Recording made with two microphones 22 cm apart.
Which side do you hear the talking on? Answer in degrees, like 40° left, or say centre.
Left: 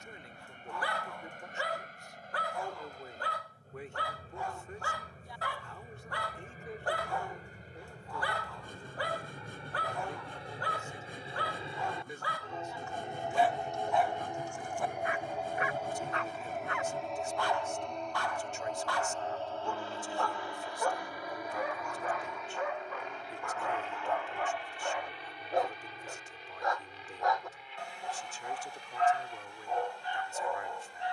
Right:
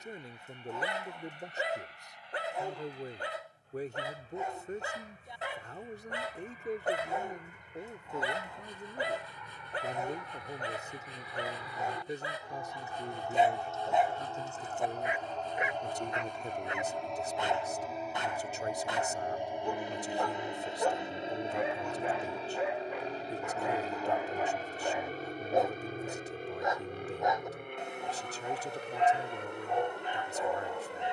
40° right.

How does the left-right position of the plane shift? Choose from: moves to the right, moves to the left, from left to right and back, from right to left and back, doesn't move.
moves to the right.